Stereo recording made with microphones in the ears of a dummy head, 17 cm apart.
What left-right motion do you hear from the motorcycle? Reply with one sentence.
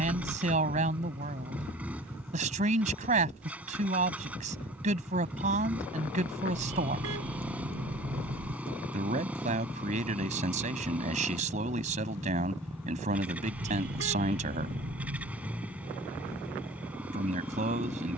In this clip you hear the motorcycle stay put.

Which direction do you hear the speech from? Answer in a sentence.
You can hear the speech on the right.